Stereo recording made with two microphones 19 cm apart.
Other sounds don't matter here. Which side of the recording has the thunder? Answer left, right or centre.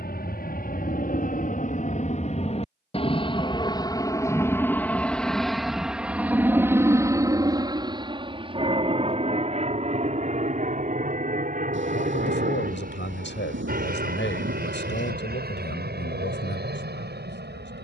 right.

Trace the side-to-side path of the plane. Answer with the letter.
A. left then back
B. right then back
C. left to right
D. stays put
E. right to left
C.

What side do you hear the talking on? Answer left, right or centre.
left.